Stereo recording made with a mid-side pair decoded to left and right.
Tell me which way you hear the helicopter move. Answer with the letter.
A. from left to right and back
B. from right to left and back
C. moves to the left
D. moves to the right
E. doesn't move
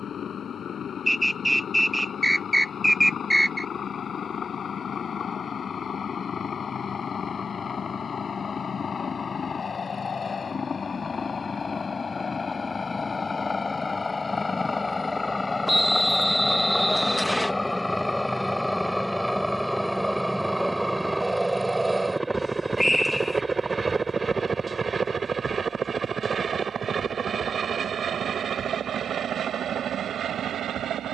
D.